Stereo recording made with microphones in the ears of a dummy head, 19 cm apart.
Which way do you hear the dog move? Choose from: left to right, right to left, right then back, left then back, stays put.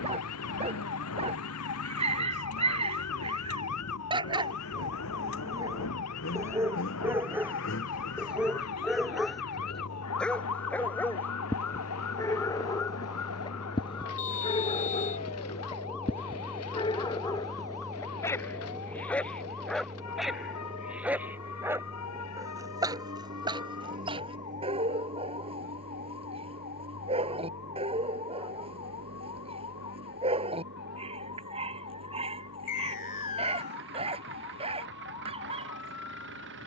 left then back.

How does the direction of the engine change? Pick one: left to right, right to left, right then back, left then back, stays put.
left to right.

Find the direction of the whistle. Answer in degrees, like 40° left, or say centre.
40° left.